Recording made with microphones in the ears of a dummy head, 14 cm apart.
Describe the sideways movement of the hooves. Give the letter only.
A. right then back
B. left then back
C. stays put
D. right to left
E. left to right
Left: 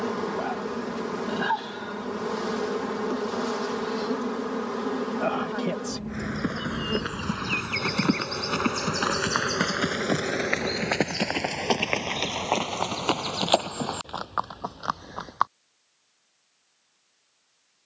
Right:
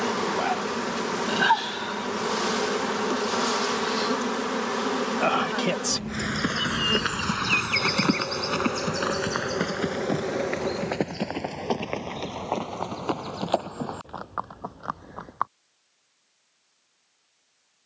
D.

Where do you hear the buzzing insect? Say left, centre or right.
right.